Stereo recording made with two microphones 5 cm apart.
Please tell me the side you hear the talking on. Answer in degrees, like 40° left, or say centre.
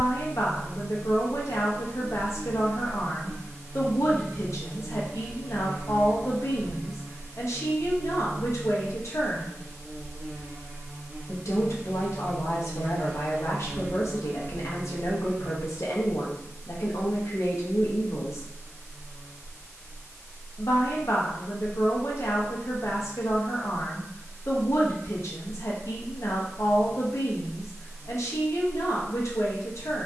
70° left.